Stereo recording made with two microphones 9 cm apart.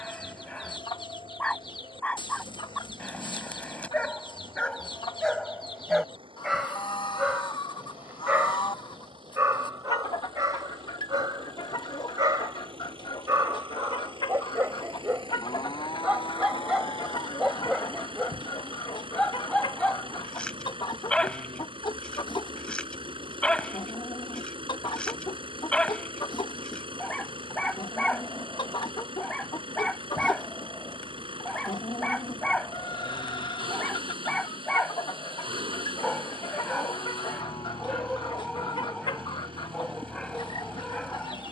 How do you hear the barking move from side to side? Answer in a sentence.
You can hear the barking move from left to right and back again.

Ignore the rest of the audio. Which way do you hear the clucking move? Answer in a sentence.
You can hear the clucking stay in one place.